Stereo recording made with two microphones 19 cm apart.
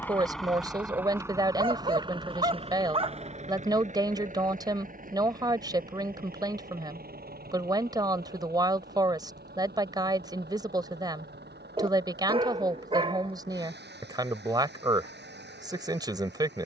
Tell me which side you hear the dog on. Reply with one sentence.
You can hear the dog on the right.